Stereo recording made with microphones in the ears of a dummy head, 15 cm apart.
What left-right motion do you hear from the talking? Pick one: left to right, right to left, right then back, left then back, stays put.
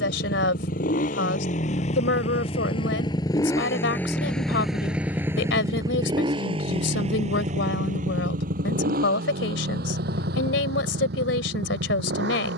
stays put.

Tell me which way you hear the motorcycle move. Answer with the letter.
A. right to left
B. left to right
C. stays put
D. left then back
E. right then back
B.